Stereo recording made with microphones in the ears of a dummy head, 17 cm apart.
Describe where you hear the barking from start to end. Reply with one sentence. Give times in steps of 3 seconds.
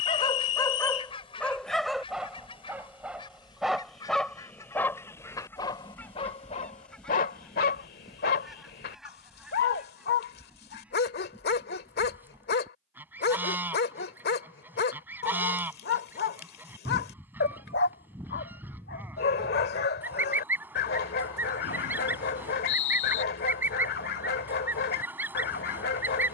In this clip you hear the barking in the centre from 0 s and on the left from 6 s.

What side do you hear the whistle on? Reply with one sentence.
You can hear the whistle on the left.